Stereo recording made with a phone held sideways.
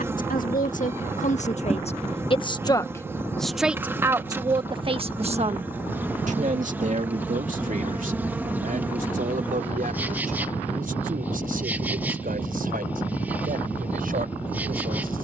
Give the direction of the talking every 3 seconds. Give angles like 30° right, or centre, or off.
50° left, 30° right, 60° right, 70° right, 80° right.